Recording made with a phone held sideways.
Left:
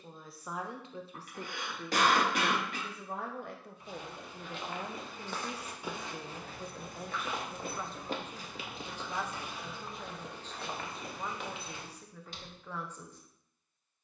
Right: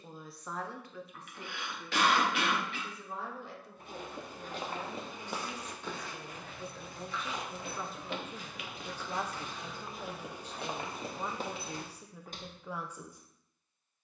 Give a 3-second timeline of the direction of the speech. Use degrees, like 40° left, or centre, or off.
30° left, 40° left, centre, 10° right, 10° right.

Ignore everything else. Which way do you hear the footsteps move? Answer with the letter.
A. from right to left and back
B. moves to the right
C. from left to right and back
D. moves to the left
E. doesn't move
A.